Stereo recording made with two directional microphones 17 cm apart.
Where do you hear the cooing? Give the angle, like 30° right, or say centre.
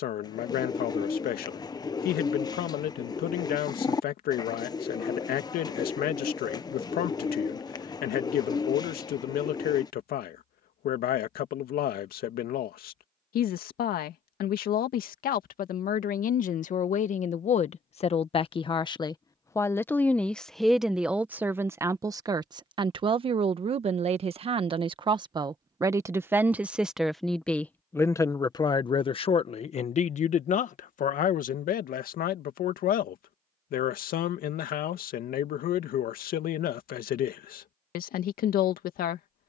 20° left.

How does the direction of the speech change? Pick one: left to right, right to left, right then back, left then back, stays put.
right then back.